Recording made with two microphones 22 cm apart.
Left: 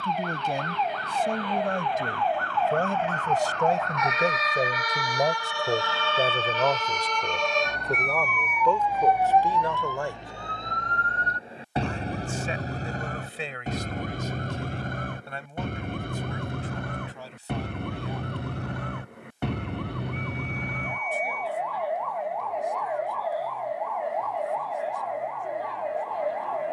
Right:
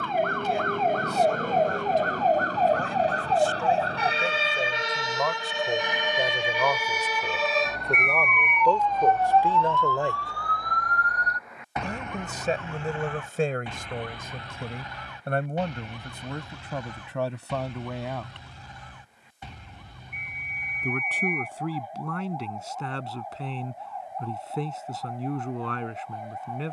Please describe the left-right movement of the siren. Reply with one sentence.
You can hear the siren travel towards the left.